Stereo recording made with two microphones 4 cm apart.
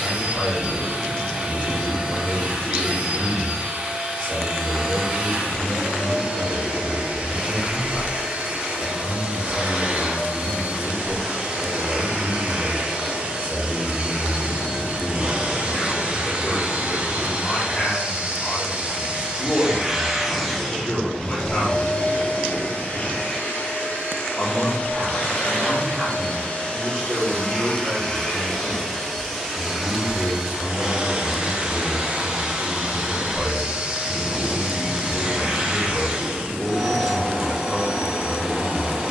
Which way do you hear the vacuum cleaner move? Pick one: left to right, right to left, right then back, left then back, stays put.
left then back.